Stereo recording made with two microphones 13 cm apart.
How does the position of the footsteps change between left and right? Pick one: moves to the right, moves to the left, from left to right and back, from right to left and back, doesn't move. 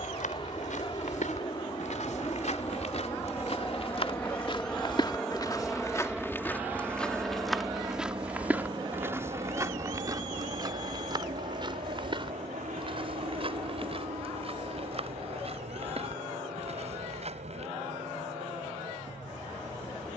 moves to the right.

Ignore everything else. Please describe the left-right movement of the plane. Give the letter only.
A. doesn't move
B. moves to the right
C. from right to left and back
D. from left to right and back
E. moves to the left
B.